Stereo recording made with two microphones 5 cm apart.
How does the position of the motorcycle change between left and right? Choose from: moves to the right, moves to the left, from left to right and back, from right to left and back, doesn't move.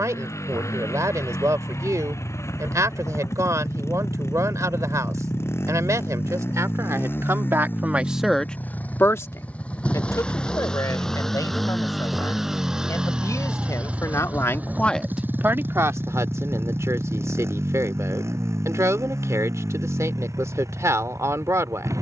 moves to the right.